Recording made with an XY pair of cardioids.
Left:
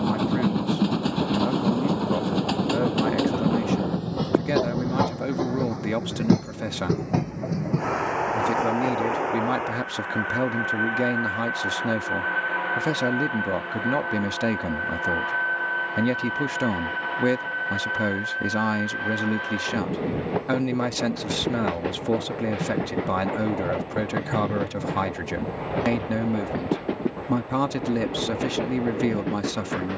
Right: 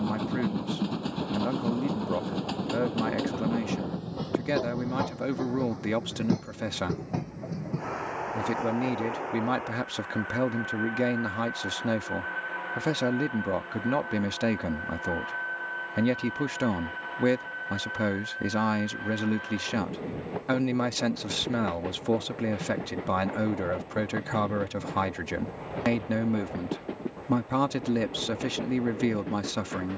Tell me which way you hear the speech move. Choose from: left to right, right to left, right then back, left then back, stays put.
stays put.